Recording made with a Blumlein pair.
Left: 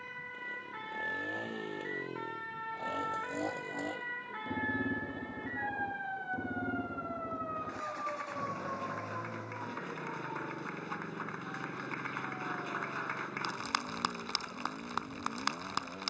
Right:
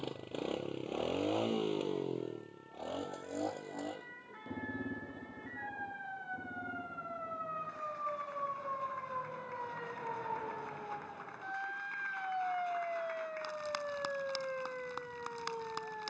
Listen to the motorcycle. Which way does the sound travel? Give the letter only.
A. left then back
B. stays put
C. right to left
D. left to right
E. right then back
C.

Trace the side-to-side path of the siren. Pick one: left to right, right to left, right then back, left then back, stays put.
left to right.